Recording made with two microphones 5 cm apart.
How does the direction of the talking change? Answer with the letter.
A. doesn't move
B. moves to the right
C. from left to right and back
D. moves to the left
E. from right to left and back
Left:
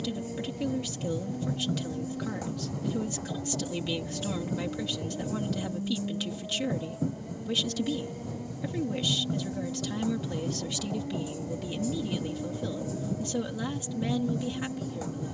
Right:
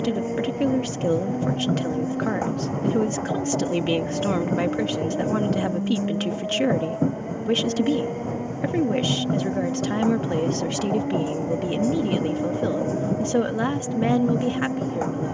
A.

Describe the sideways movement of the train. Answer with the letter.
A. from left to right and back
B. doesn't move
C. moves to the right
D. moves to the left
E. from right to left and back
B.